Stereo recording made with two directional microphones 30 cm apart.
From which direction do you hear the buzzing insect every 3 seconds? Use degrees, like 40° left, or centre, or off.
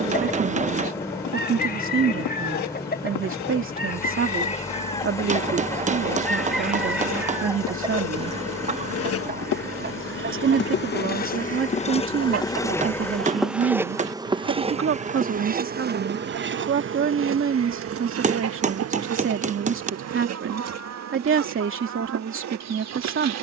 70° left, 70° left, 60° left, 40° left, centre, 40° right, 60° right, 60° right.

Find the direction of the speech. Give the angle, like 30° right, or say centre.
40° right.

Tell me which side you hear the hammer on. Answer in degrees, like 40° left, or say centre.
20° right.